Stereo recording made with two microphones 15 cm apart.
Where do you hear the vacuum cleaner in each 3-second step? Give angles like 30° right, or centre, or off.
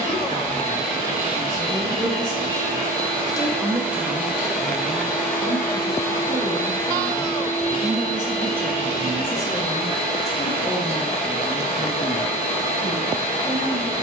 40° right, centre, 40° left, 60° left, 60° left.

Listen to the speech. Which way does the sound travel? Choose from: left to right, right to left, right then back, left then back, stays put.
right then back.